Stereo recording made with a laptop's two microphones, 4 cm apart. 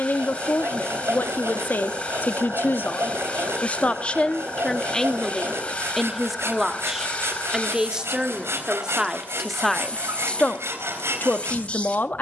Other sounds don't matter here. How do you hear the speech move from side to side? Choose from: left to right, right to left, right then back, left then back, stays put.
right then back.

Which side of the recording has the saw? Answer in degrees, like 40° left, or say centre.
80° right.